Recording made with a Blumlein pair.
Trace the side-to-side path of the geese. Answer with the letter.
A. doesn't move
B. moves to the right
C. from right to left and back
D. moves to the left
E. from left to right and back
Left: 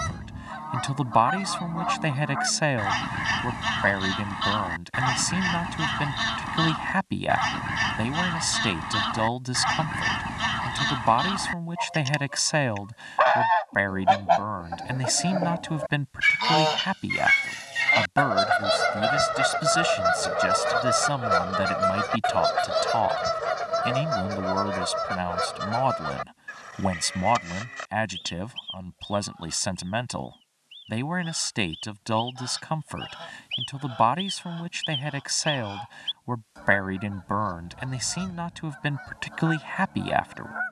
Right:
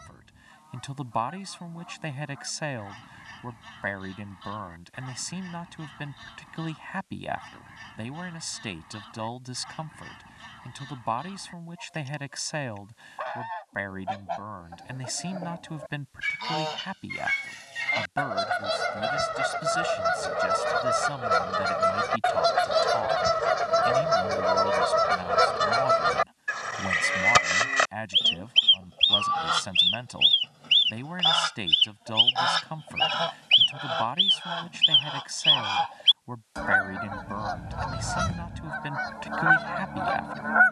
B.